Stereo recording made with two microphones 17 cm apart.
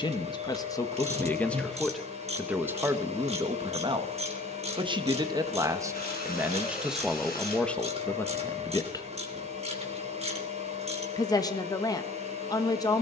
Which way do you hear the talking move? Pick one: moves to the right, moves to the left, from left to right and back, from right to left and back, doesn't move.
from left to right and back.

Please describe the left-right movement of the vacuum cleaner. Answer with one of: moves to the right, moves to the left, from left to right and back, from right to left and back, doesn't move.
doesn't move.